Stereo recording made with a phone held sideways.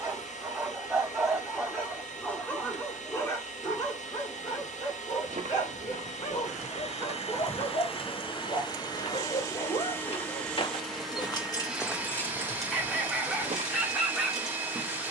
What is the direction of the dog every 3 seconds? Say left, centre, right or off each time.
centre, left, left, left, centre.